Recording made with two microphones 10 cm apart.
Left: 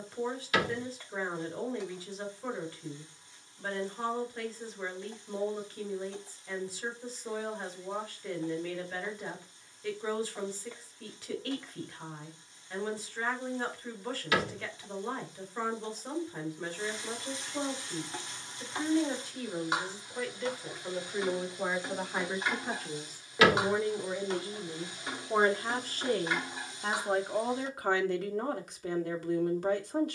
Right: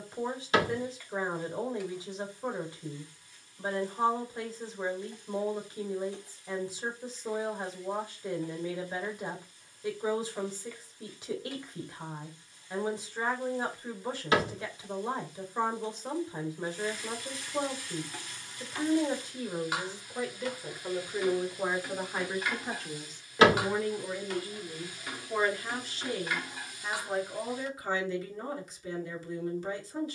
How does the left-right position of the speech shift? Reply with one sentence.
You can hear the speech move to the left.